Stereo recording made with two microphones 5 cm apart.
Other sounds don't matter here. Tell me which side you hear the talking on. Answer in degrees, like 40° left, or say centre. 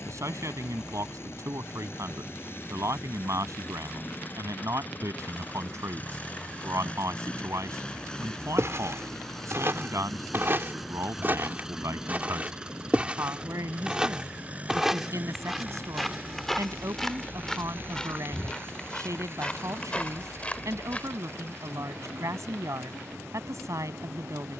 70° right.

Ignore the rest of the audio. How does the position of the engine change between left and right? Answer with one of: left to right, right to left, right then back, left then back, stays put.
left to right.